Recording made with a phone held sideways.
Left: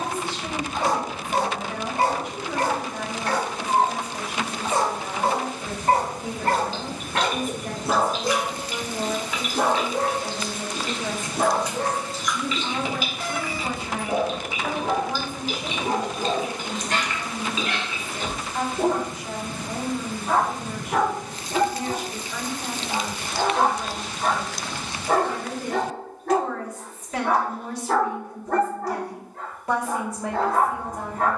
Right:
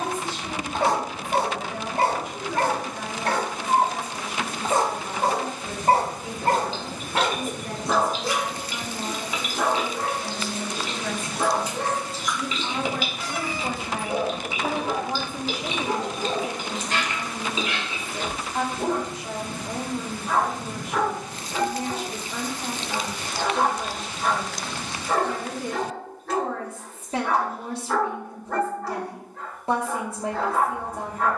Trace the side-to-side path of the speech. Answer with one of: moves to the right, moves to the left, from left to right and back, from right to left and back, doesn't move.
moves to the right.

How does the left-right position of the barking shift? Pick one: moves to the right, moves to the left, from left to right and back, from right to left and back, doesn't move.
moves to the left.